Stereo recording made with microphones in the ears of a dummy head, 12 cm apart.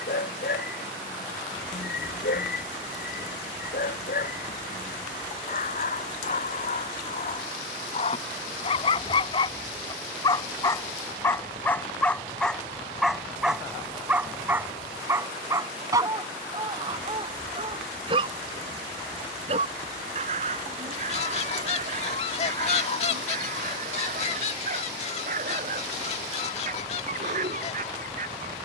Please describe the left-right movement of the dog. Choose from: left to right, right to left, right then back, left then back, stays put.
left to right.